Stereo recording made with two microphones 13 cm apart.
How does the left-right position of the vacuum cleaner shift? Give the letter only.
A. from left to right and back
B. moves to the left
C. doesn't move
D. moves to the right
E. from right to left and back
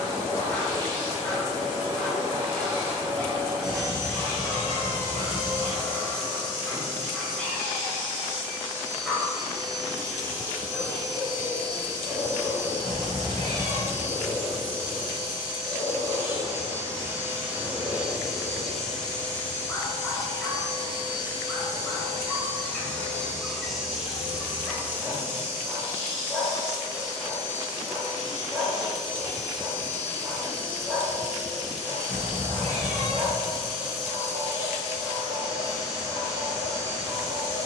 E.